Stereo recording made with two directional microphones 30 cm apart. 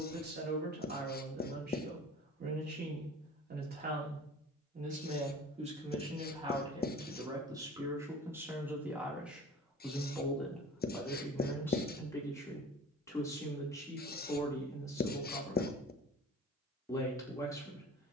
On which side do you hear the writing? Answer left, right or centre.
left.